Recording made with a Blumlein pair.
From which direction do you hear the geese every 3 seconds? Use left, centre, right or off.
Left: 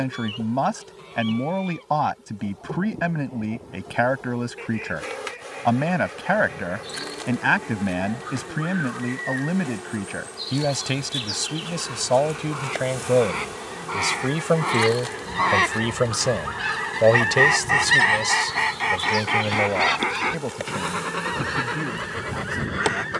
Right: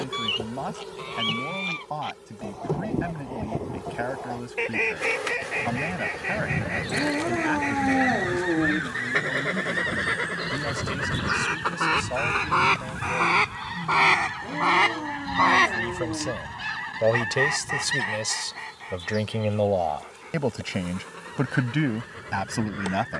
right, right, right, right, right, centre, left, left.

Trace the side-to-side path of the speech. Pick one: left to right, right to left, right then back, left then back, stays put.
left to right.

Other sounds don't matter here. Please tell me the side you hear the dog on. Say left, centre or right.
right.